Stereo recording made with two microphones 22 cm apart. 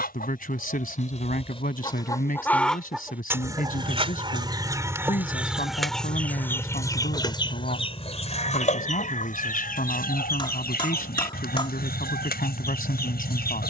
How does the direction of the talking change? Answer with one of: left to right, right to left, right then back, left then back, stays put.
stays put.